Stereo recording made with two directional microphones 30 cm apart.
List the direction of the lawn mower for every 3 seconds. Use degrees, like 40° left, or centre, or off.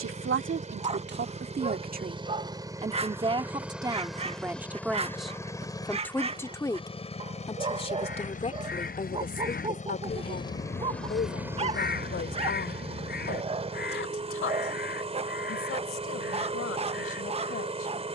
20° right, centre, 20° left, 10° left, 20° right, 20° right.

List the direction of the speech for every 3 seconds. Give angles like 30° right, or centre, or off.
30° right, 10° right, 20° left, 30° left, 40° left, 50° left.